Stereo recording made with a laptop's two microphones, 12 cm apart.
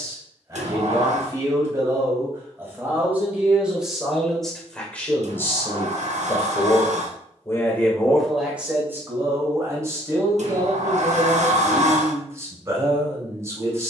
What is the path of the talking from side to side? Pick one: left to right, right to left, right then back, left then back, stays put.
left then back.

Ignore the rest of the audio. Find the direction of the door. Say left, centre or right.
right.